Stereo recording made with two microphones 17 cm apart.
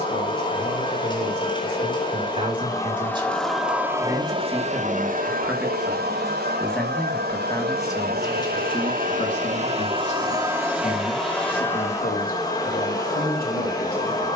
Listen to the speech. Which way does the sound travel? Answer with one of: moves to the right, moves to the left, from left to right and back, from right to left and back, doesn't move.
moves to the left.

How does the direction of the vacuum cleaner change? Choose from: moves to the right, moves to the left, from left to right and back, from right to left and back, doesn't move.
from left to right and back.